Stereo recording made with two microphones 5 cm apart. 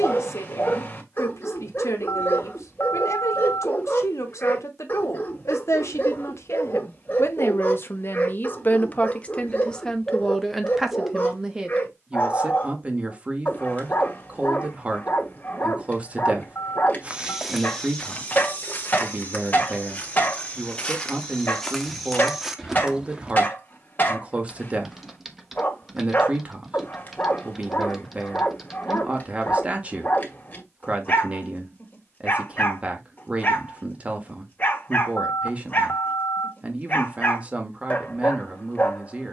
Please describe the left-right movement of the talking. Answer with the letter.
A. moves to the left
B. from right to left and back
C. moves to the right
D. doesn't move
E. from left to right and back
C.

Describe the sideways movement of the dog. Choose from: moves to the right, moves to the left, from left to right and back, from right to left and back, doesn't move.
doesn't move.